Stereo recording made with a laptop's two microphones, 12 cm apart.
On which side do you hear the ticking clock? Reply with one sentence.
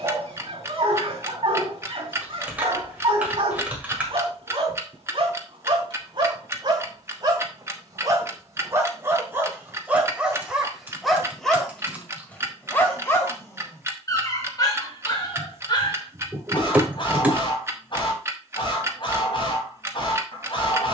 You can hear the ticking clock on the right.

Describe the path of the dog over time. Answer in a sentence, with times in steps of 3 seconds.
In this clip you hear the dog on the right from 0 s, in the centre from 9 s and on the left from 12 s.